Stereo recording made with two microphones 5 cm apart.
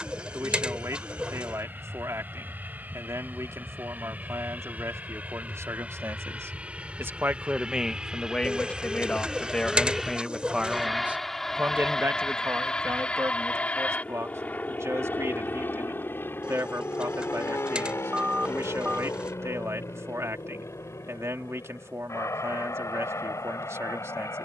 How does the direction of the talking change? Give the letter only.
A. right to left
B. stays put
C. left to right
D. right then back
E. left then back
E.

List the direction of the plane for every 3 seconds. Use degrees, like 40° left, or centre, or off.
50° right, 40° right, 20° right, centre, 20° left, 50° left, 60° left, 70° left.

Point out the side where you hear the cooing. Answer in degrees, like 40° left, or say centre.
20° right.